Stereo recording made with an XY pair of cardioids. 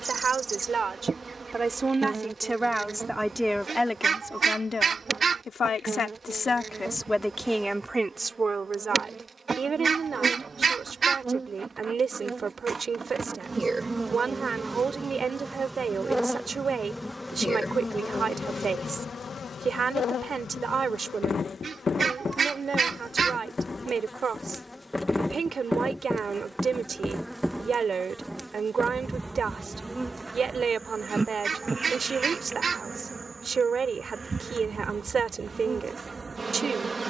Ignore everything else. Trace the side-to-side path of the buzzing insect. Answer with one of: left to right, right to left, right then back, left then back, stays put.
left then back.